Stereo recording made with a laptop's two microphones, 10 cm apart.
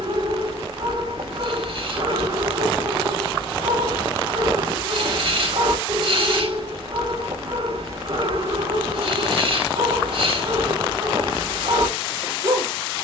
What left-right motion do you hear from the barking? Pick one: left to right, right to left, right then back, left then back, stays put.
stays put.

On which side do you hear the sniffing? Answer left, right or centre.
right.